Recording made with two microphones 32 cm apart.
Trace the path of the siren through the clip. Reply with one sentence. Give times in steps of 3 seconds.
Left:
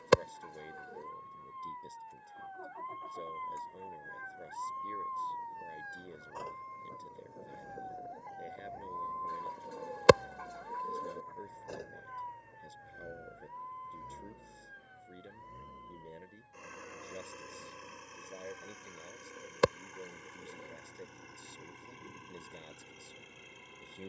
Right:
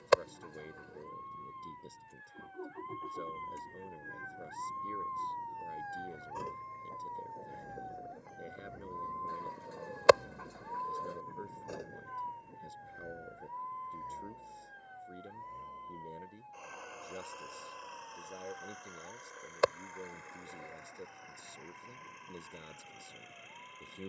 You can hear the siren on the left from 0 s, in the centre from 6 s and on the right from 9 s.